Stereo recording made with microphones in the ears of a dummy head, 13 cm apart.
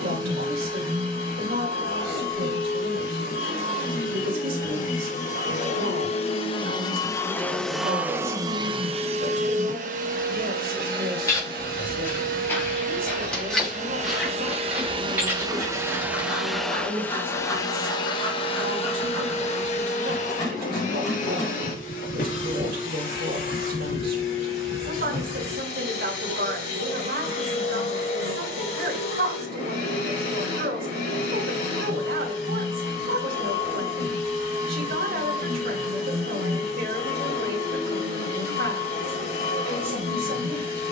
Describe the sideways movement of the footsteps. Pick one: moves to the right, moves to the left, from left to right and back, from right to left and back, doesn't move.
moves to the right.